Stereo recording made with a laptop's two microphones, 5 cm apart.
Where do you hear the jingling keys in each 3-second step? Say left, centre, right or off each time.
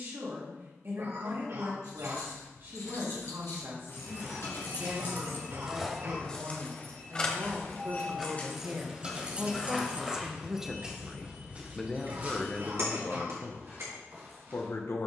left, left, centre, right, right.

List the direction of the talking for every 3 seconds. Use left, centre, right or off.
right, right, right, centre, left.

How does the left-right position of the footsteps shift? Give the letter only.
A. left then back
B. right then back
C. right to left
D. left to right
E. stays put
A.